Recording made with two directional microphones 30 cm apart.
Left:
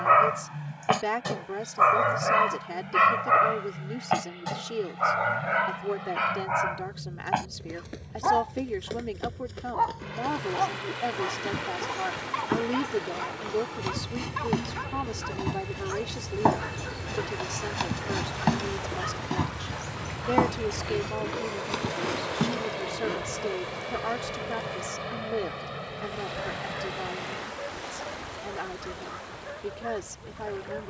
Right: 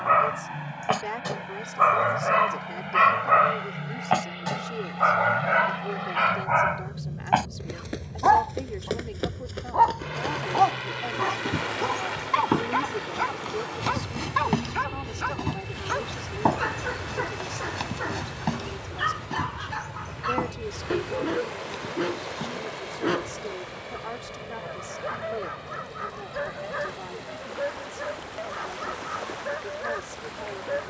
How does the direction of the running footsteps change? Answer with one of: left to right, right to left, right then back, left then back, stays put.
right to left.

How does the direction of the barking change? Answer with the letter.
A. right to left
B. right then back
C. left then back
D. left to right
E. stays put
D.